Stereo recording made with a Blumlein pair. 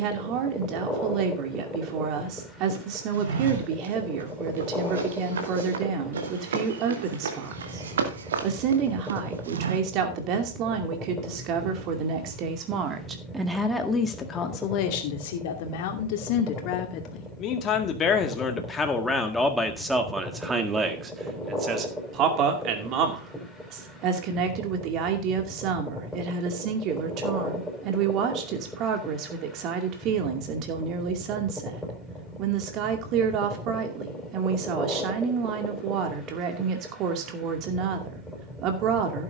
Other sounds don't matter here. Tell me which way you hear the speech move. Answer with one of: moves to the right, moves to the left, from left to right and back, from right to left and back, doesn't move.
from right to left and back.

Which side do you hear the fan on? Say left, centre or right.
centre.